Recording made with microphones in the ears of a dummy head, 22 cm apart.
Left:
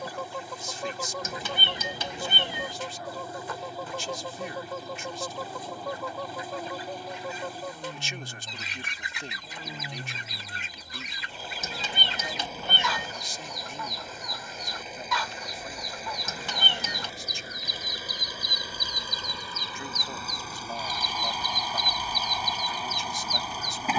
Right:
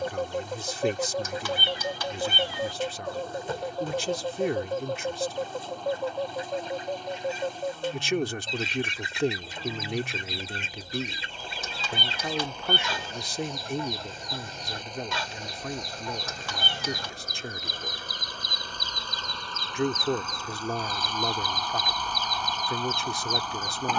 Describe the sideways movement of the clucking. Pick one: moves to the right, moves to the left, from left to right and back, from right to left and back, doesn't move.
doesn't move.